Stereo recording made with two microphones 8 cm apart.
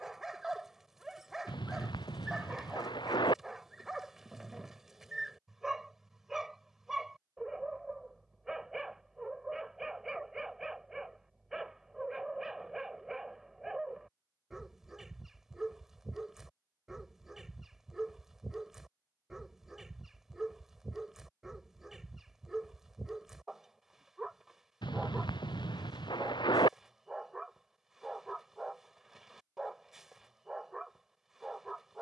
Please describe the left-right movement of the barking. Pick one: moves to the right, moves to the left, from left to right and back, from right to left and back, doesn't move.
doesn't move.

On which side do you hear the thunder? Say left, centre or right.
left.